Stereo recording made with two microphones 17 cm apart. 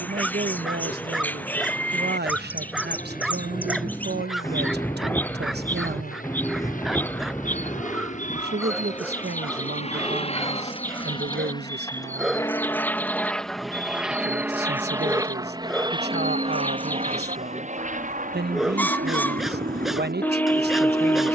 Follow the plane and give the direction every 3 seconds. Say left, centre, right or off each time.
left, left, left, left, centre, right, right.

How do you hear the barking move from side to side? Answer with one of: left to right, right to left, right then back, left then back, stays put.
stays put.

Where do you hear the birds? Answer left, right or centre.
centre.